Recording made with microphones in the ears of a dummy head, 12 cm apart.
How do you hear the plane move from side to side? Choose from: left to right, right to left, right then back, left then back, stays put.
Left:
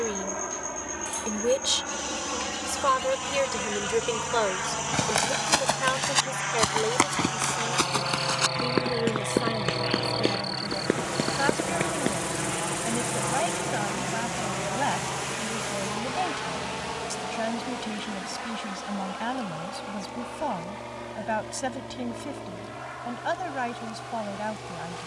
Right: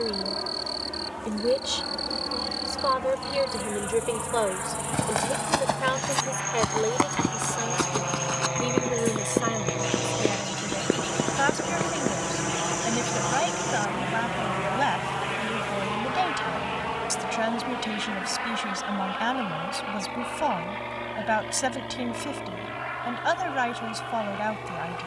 left to right.